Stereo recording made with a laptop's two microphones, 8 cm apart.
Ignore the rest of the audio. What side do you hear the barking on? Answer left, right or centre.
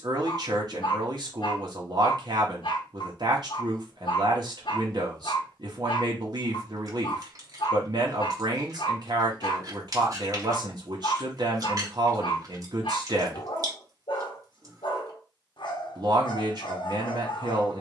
left.